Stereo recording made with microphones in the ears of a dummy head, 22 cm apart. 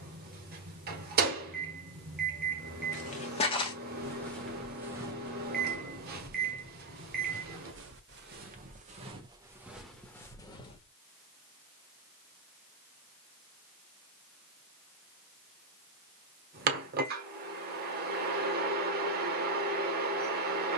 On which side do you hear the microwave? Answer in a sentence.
You can hear the microwave on the right.